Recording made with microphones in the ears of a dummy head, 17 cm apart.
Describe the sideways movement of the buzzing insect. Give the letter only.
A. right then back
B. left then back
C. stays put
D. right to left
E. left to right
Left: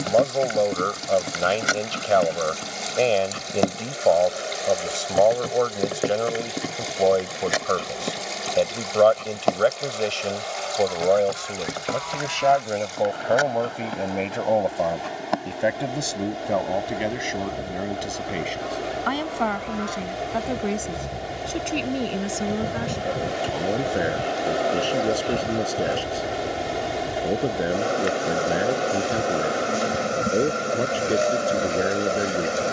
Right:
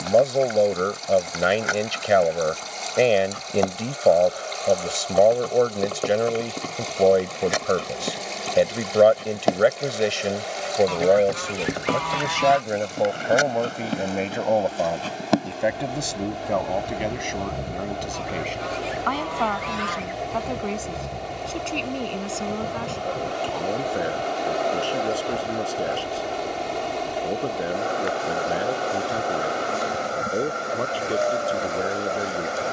A.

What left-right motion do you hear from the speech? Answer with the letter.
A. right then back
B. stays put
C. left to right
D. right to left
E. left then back
D.